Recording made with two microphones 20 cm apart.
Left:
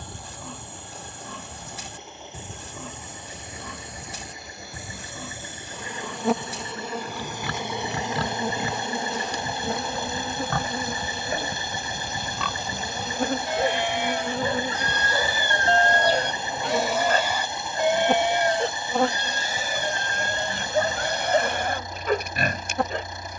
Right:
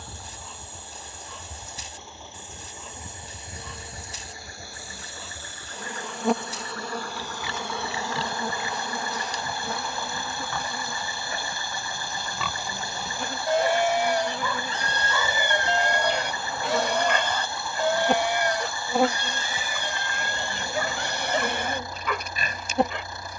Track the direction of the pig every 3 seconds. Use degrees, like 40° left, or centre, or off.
60° left, 60° left, 60° left, 50° left, 30° right, 10° right, 40° left, 60° left.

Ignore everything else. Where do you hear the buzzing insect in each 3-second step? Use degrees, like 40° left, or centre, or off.
20° right, 10° right, 10° left, 40° left, 40° left, 20° left, 10° right, 20° right.